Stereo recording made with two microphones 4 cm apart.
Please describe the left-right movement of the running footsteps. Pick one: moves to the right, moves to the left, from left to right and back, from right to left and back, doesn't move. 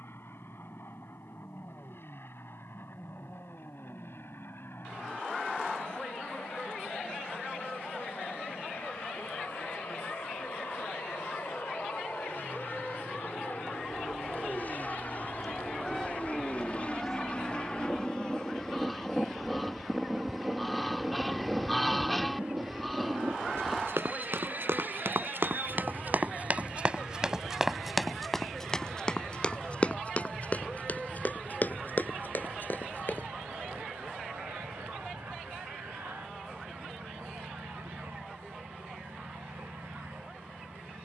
moves to the left.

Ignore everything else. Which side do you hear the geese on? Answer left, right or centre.
centre.